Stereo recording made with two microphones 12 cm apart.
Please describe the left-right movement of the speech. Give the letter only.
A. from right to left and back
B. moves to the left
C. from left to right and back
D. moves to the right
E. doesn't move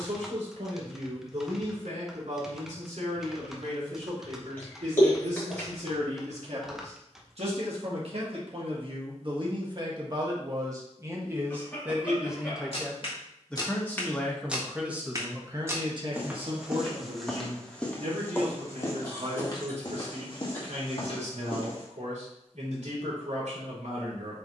A.